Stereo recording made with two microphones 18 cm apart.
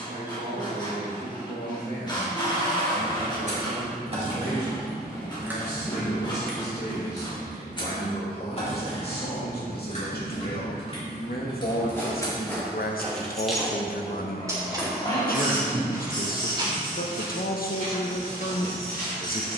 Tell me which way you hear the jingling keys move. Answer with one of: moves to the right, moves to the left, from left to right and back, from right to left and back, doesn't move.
from right to left and back.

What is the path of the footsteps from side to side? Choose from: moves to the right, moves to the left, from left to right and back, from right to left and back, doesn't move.
moves to the right.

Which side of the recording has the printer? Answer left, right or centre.
left.